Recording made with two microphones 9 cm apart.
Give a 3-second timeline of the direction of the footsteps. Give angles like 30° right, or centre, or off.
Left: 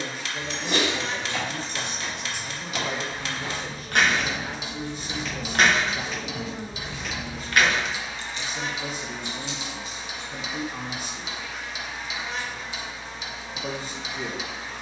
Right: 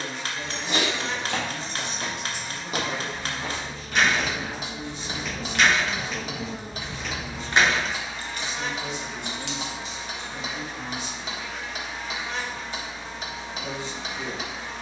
60° right, 20° right, centre, off, off.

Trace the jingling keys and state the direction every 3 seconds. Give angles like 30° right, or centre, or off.
70° left, 50° left, 20° right, 70° right, off.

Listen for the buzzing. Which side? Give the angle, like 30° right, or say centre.
centre.